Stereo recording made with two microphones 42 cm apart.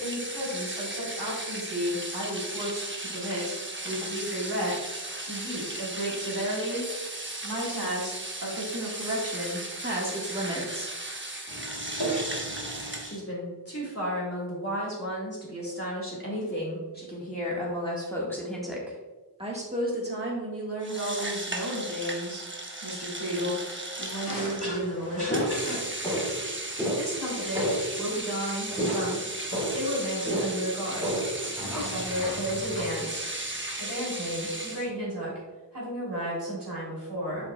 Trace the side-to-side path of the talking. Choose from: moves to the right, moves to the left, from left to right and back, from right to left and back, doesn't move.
from right to left and back.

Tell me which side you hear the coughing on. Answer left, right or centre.
left.